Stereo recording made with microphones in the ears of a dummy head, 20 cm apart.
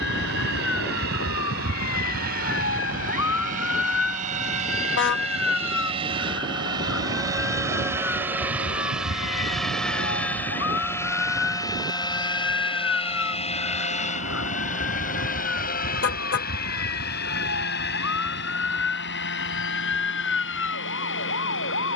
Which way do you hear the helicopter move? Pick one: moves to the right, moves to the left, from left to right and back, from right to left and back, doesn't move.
moves to the left.